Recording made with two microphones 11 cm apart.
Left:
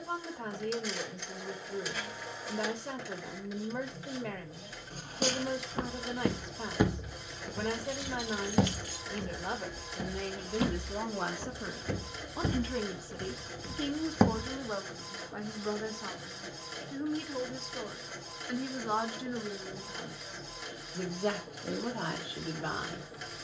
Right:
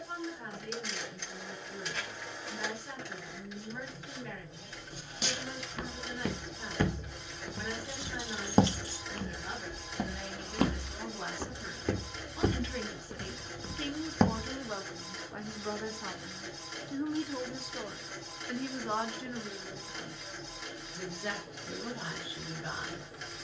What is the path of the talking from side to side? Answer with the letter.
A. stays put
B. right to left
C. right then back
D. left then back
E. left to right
C.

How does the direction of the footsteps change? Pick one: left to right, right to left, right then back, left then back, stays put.
right then back.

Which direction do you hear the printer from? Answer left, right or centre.
centre.